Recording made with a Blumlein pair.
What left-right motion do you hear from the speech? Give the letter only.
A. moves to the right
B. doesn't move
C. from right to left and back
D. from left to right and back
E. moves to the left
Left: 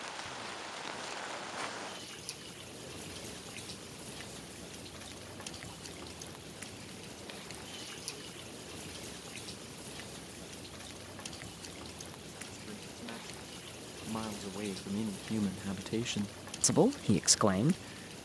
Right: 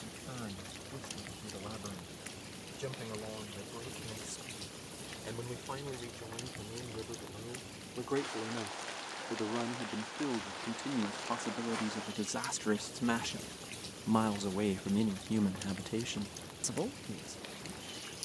E.